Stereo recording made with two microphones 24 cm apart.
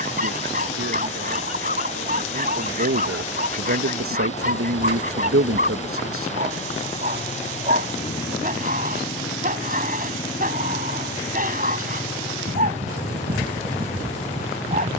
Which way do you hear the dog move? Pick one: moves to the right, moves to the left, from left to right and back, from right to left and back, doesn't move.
doesn't move.